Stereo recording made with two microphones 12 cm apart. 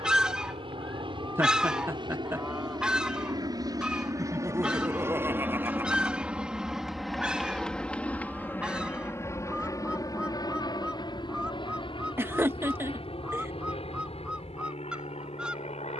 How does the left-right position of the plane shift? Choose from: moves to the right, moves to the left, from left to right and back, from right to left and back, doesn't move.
moves to the left.